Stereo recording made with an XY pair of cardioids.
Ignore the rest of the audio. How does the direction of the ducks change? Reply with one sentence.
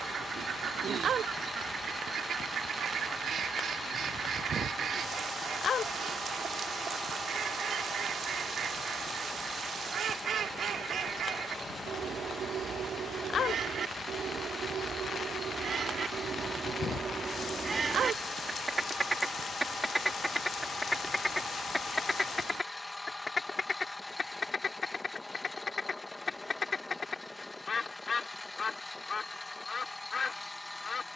You can hear the ducks go from the right side to the left.